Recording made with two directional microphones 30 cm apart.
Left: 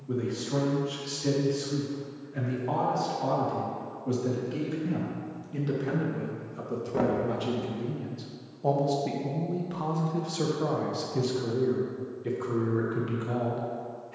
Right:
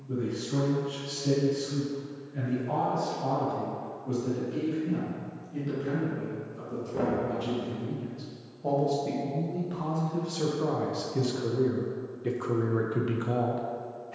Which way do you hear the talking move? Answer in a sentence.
You can hear the talking travel towards the right.